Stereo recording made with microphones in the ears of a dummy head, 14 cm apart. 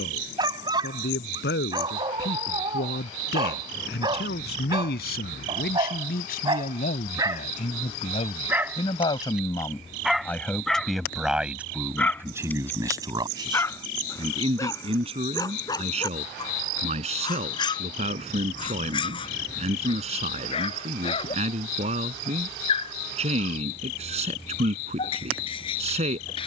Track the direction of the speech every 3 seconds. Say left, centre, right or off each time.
left, left, left, centre, right, right, right, right, right.